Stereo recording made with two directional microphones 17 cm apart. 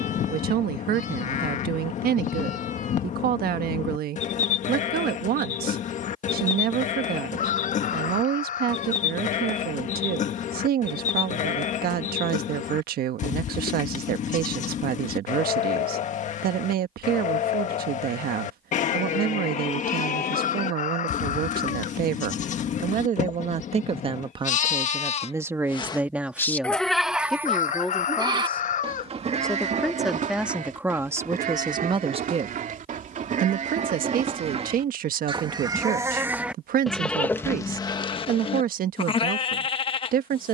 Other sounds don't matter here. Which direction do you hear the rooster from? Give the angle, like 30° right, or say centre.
50° left.